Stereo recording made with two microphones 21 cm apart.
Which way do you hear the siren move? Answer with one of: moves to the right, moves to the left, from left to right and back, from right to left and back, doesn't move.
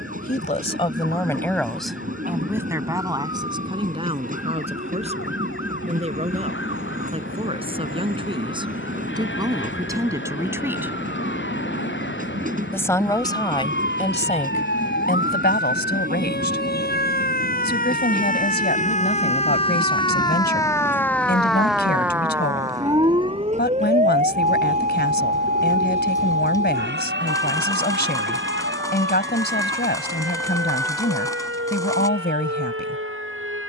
moves to the right.